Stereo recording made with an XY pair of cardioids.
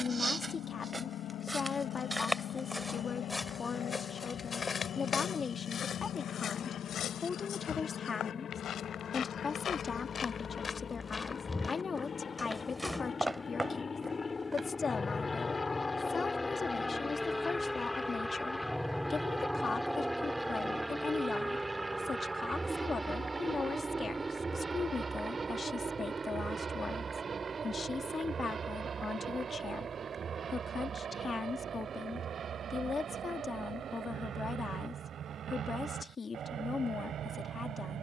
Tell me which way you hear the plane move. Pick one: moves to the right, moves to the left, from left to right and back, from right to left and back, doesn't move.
moves to the right.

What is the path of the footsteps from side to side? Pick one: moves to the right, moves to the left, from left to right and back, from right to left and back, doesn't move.
from right to left and back.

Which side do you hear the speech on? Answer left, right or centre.
left.